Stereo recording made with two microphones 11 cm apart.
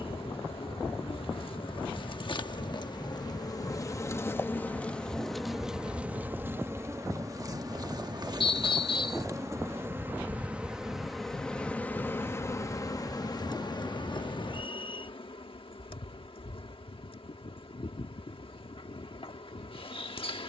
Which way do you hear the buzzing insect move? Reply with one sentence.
In this clip you hear the buzzing insect move from left to right and back again.